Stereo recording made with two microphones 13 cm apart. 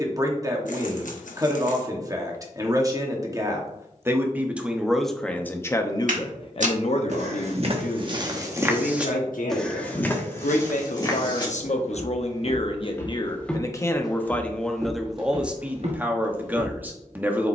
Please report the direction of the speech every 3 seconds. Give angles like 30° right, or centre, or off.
30° right, 10° right, 60° left, 70° left, 30° left, 10° right.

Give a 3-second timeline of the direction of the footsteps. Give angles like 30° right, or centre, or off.
off, off, 40° right, 20° left, 10° left, 50° right.